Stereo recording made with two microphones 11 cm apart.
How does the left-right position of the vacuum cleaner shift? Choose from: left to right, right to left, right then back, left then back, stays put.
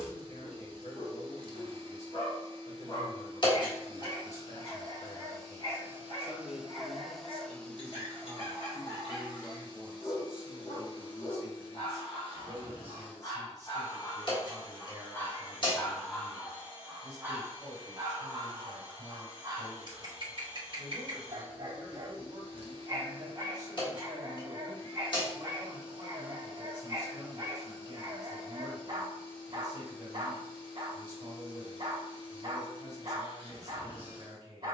right to left.